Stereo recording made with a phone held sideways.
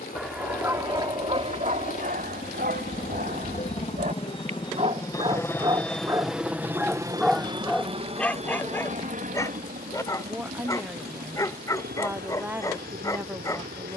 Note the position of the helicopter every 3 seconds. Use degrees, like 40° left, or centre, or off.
60° left, 30° left, 20° right, 60° right, 70° right.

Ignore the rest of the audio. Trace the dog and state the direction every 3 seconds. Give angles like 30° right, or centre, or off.
40° right, 50° right, centre, 20° left, 20° left.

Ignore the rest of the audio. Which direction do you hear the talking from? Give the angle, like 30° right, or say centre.
10° right.